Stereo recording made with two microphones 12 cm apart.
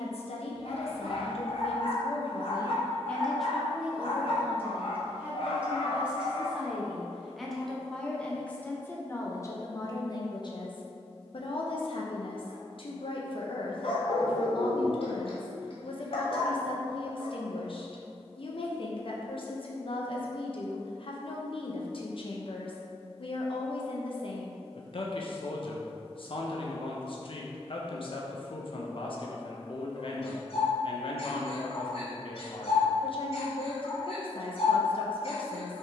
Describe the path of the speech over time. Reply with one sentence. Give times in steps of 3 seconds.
You can hear the speech on the left from 0 s, in the centre from 3 s and on the left from 9 s.